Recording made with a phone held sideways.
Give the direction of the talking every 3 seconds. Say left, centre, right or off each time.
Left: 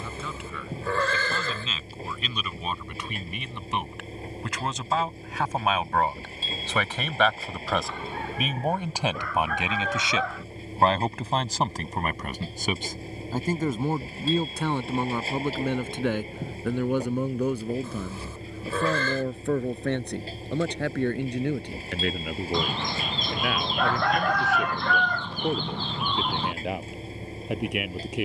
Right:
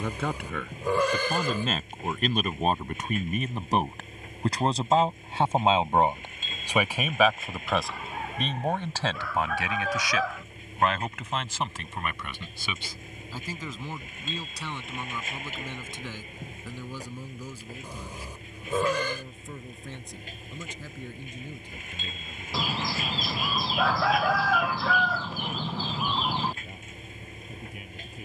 right, right, centre, left, left, left, left, left, left, left.